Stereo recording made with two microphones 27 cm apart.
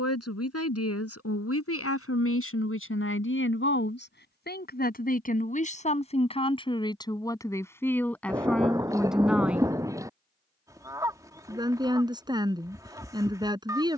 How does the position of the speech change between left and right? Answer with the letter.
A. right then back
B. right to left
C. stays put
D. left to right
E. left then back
D.